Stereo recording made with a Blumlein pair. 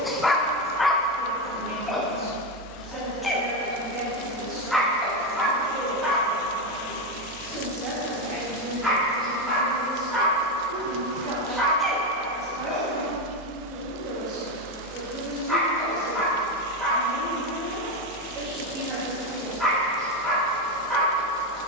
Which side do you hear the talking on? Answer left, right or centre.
right.